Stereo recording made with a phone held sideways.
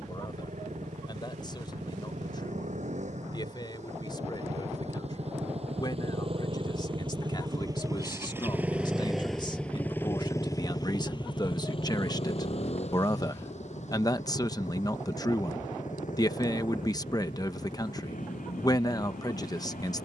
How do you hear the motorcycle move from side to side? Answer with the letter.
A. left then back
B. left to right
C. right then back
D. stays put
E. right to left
E.